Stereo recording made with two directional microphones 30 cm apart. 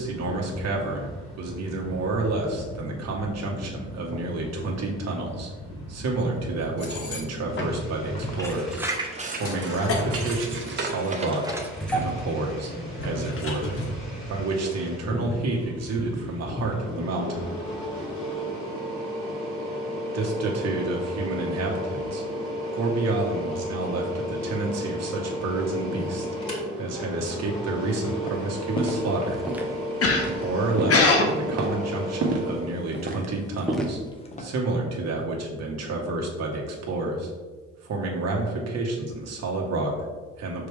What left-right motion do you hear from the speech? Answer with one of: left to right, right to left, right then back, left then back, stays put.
stays put.